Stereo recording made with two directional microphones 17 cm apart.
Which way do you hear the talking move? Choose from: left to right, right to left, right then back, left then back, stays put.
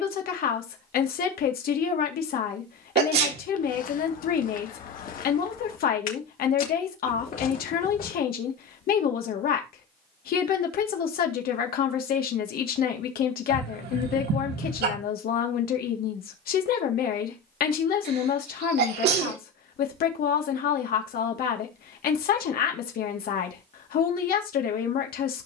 stays put.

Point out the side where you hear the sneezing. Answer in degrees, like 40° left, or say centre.
70° right.